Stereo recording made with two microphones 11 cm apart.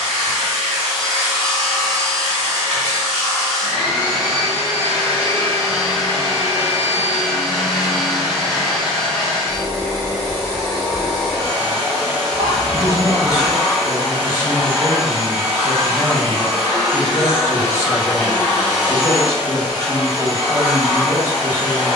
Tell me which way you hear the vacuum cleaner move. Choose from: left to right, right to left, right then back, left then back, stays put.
stays put.